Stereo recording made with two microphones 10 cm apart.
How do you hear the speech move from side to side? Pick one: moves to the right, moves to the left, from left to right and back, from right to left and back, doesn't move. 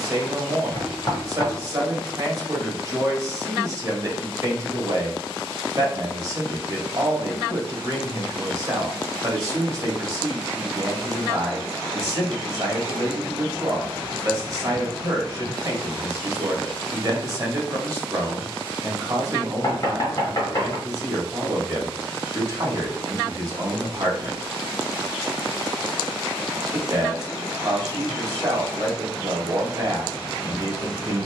doesn't move.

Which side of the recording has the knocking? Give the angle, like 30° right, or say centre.
40° left.